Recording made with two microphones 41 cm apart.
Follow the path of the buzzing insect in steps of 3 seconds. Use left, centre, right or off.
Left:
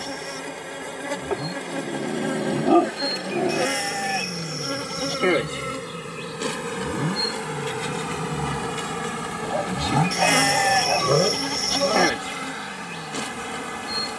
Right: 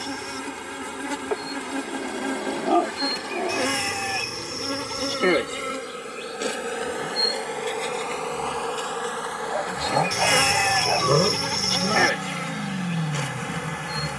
right, centre, left, left, left.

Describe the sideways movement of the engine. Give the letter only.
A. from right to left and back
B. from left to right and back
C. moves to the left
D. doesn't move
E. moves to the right
E.